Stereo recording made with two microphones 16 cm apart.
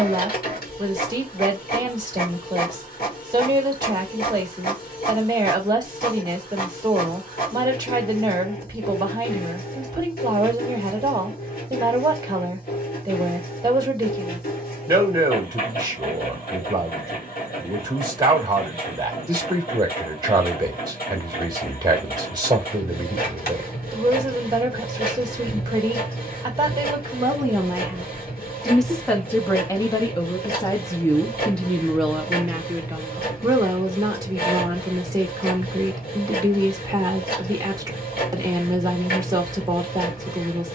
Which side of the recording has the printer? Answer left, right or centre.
left.